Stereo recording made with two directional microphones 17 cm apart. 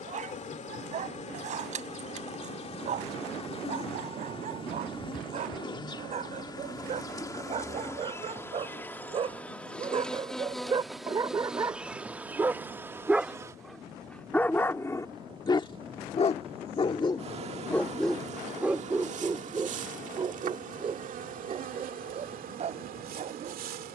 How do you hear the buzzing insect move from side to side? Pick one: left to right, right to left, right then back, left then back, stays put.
left to right.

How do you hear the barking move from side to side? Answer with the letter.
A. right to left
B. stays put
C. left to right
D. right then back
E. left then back
E.